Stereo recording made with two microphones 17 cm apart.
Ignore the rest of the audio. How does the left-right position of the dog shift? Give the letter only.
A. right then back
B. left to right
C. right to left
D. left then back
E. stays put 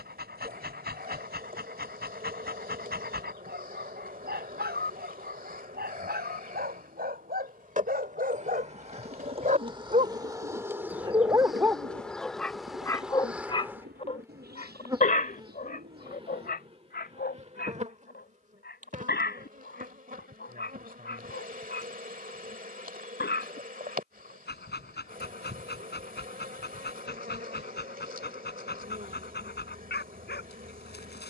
C.